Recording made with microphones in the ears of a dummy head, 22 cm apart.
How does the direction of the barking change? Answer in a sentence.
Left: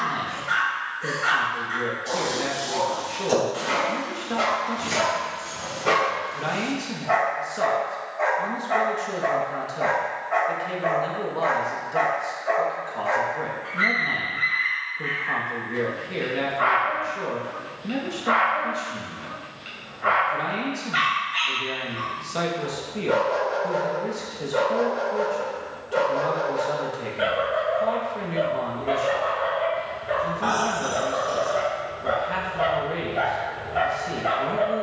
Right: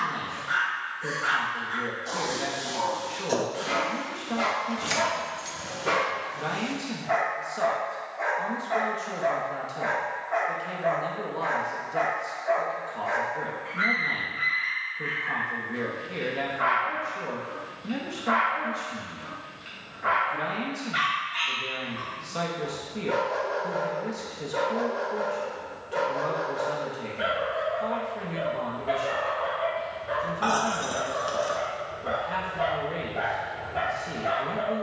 You can hear the barking stay in one place.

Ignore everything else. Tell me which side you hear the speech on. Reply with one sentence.
In this clip you hear the speech in the centre.